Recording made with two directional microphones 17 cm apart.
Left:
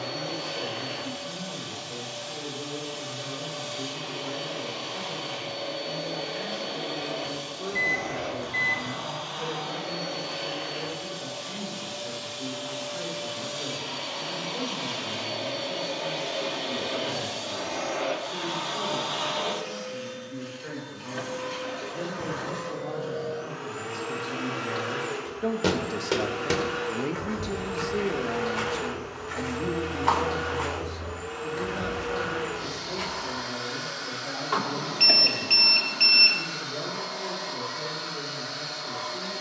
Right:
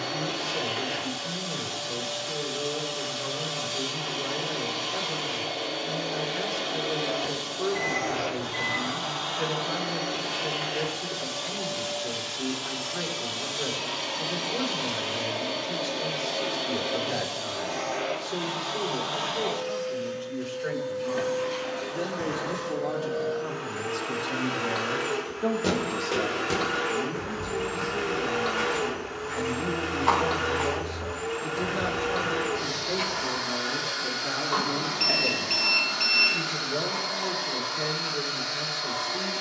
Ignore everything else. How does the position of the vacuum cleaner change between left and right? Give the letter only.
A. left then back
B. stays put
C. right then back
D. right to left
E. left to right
A.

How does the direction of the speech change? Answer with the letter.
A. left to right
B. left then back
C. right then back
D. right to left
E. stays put
B.